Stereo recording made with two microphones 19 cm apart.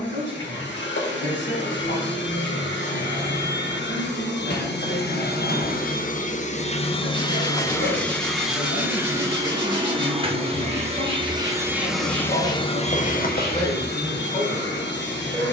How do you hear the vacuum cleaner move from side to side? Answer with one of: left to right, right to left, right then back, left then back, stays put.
right then back.